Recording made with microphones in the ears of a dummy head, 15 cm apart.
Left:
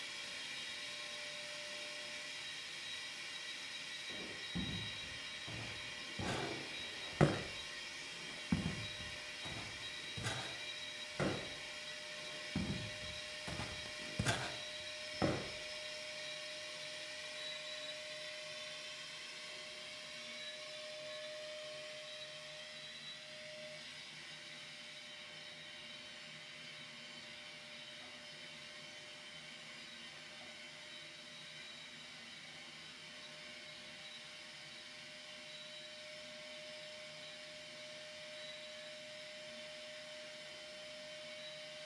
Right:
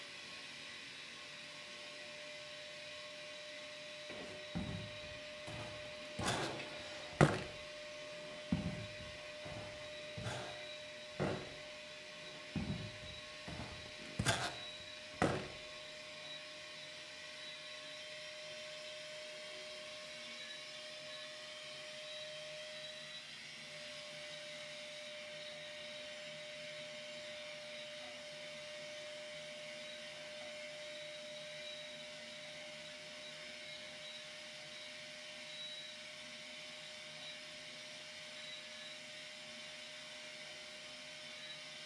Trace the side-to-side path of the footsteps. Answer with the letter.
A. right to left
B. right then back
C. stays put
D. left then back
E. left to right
D.